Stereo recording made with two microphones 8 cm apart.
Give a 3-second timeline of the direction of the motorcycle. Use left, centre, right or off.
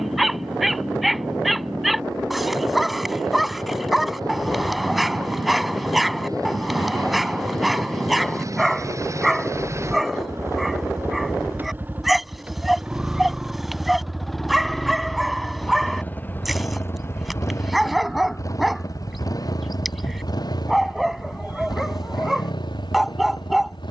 right, right, right, right, centre, left, left, left.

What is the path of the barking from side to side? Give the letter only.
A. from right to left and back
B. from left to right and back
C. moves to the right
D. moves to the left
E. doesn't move
E.